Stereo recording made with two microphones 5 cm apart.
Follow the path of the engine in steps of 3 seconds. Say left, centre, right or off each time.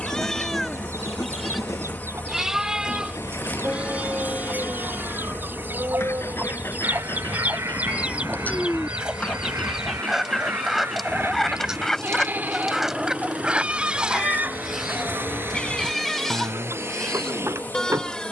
left, left, left, centre, right, right.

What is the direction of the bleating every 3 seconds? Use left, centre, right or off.
centre, right, right, right, right, centre.